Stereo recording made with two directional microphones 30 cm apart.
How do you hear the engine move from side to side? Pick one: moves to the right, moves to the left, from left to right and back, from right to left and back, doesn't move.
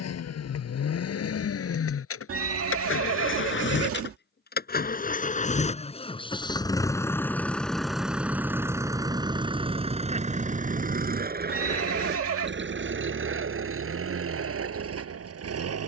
moves to the right.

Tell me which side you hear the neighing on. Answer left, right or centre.
right.